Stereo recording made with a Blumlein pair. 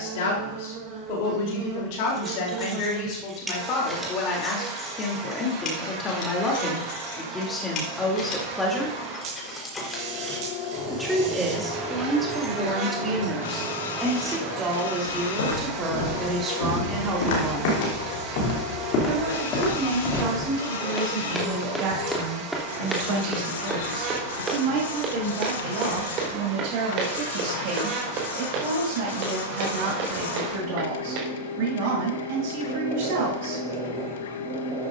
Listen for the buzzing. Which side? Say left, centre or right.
right.